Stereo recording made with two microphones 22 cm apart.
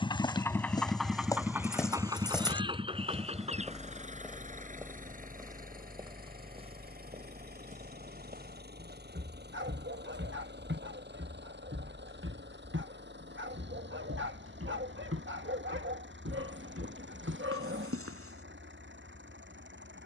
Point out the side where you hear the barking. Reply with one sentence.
You can hear the barking on the right.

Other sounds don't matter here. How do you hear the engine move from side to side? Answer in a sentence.
You can hear the engine go from the left side to the right.